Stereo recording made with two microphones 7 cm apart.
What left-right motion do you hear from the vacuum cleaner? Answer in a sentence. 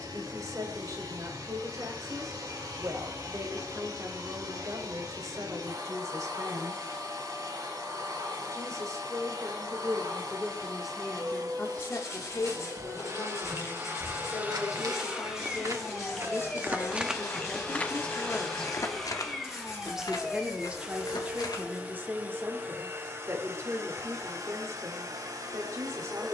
You can hear the vacuum cleaner go left and come back.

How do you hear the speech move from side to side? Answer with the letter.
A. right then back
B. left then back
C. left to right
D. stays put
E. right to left
B.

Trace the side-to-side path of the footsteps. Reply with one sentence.
You can hear the footsteps go from the right side to the left.